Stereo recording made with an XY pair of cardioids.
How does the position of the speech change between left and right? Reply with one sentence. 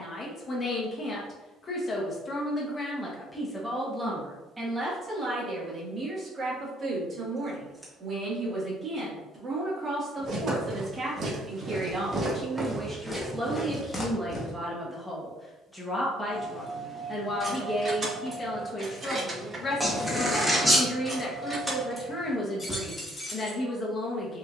In this clip you hear the speech go right and come back.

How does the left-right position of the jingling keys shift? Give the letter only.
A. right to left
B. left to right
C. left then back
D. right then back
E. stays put
D.